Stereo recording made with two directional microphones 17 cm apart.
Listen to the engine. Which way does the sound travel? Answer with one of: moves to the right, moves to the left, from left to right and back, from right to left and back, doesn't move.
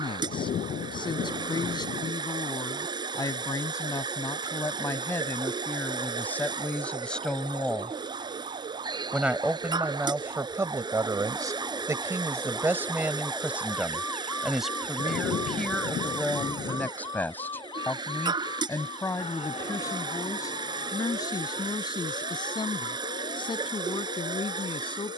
doesn't move.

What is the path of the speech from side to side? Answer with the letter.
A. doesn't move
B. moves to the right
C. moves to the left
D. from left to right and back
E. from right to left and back
D.